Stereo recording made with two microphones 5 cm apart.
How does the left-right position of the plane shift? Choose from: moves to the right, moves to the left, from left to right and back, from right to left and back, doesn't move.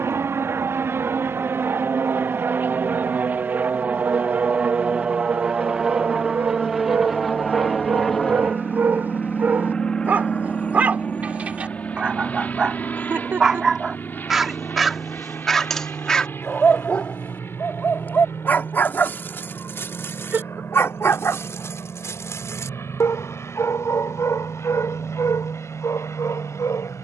moves to the left.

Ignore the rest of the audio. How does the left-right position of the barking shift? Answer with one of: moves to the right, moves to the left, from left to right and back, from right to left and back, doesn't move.
moves to the left.